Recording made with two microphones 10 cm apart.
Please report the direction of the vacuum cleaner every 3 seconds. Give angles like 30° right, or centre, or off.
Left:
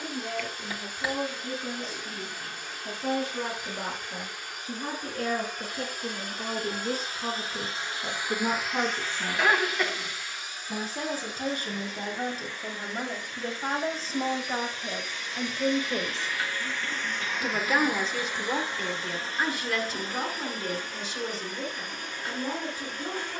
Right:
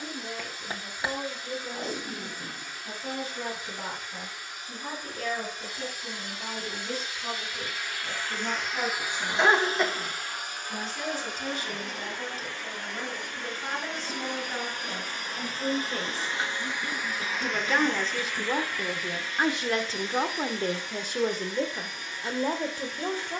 60° left, 60° left, 30° left, 50° right, 60° right, 20° right, 30° left, 50° left.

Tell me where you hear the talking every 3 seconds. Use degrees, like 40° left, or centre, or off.
60° left, 60° left, 50° left, 50° left, 40° left, 20° left, 20° right, 60° right.